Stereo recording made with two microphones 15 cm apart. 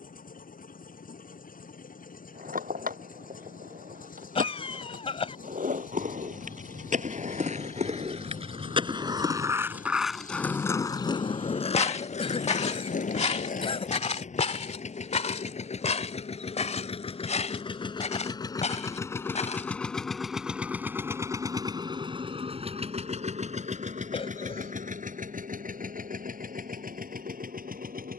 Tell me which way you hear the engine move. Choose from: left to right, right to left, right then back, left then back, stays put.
left to right.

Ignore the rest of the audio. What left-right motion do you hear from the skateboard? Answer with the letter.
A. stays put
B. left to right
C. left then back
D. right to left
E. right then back
D.